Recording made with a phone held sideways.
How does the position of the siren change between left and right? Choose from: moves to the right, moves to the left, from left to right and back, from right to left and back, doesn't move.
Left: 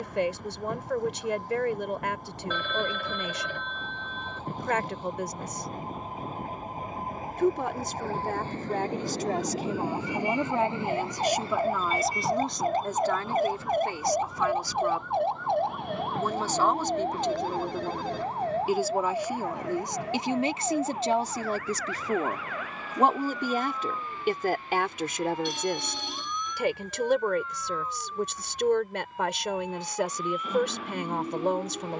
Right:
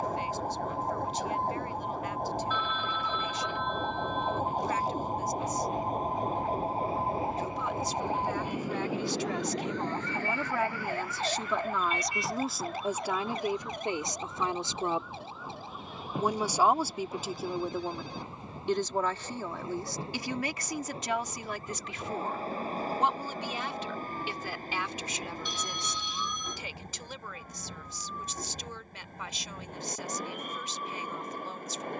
moves to the left.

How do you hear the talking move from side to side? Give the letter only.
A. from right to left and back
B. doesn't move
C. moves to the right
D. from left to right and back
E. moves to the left
D.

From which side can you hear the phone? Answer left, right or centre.
left.